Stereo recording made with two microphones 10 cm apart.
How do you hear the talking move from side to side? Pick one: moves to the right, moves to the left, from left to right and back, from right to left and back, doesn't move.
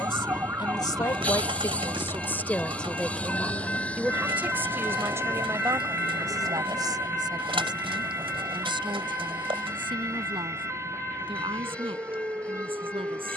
moves to the right.